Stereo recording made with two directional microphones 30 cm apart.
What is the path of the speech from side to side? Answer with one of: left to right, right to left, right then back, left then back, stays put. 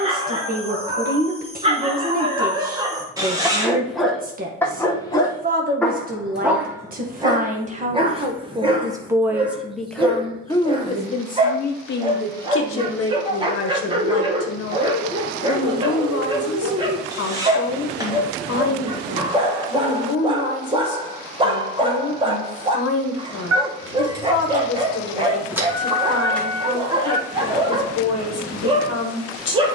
right to left.